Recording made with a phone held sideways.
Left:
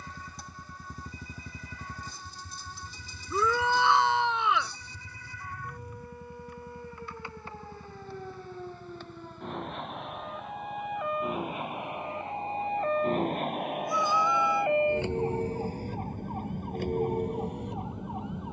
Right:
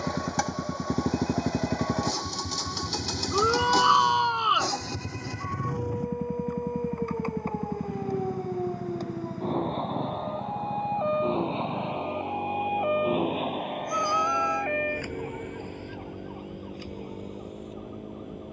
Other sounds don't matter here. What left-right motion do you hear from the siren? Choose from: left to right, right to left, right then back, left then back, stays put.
right to left.